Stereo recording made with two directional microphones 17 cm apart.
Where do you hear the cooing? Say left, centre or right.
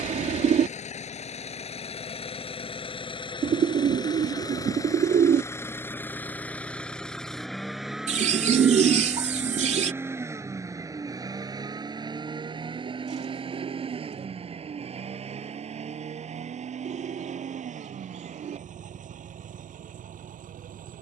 right.